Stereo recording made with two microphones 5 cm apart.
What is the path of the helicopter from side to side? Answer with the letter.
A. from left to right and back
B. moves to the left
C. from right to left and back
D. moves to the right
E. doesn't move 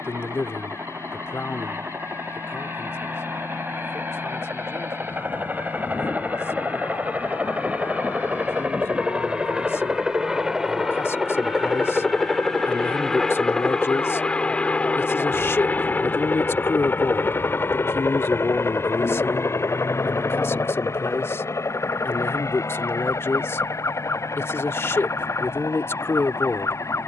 B.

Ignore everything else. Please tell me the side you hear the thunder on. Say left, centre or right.
left.